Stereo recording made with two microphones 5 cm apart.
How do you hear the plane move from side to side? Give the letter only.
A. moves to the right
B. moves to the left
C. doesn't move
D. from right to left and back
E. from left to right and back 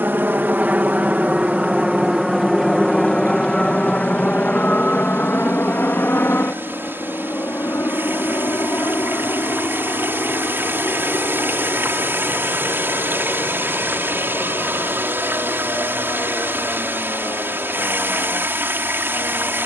B.